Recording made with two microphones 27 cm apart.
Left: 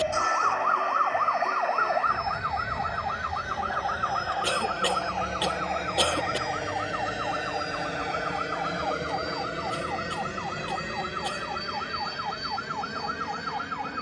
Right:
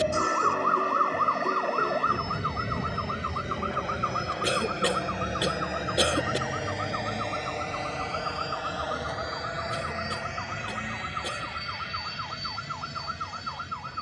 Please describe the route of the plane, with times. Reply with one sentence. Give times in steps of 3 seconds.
You can hear the plane on the right from 0 s, in the centre from 6 s and on the left from 9 s.